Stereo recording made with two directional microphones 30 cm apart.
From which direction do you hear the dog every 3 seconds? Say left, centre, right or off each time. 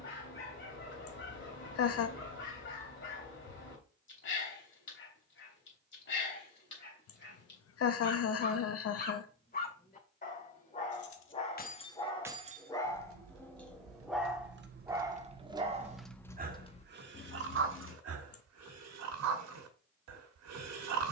left, left, left, left, centre, right, right.